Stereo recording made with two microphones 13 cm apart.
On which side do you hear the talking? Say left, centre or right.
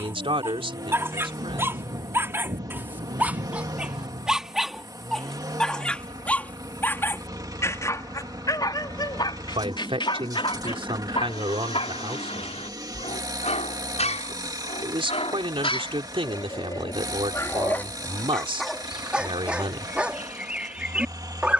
right.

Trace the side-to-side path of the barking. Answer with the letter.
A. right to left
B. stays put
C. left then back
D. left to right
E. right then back
C.